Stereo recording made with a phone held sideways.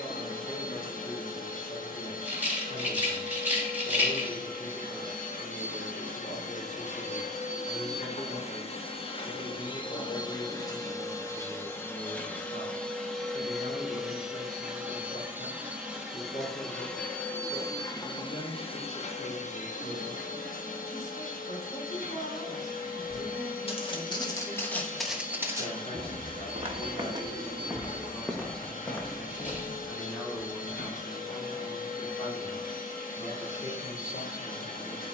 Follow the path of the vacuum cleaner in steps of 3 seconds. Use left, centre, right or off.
left, left, left, left, centre, centre, left, left, left, left, left, left.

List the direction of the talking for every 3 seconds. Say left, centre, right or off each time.
left, left, left, left, left, left, left, left, left, centre, left, left.